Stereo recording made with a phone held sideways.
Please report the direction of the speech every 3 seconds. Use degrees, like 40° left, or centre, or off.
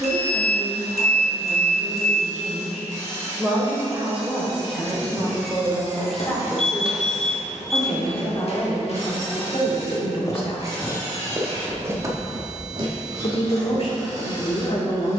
20° right, 10° right, 20° left, 40° left, 50° left.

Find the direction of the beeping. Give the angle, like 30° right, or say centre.
60° left.